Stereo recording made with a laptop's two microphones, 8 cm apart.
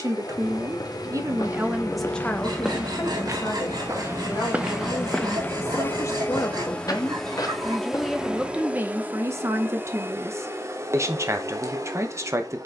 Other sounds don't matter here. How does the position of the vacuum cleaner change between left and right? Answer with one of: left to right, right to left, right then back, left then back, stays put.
left to right.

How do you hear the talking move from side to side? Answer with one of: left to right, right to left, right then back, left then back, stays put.
left then back.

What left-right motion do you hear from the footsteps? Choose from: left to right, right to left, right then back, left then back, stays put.
right then back.